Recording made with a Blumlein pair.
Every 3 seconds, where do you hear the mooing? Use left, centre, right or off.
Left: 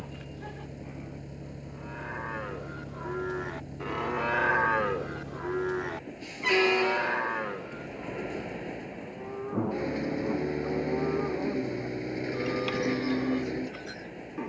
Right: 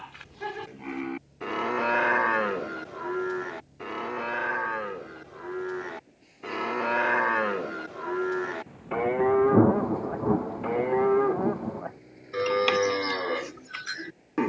right, centre, right, right, right.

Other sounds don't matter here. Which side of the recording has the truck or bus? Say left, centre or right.
left.